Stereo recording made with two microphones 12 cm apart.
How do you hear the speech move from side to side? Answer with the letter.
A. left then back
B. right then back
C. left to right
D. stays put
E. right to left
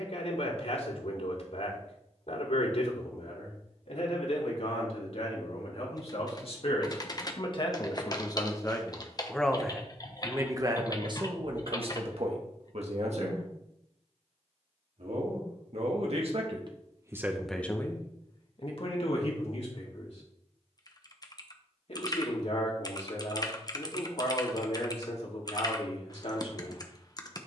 B.